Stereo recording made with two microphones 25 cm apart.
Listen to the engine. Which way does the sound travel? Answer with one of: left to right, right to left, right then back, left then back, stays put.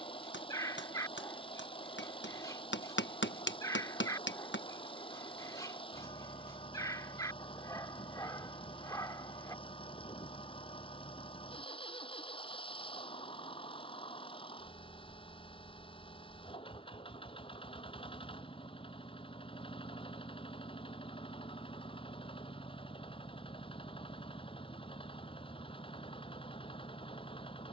stays put.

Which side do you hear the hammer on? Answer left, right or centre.
left.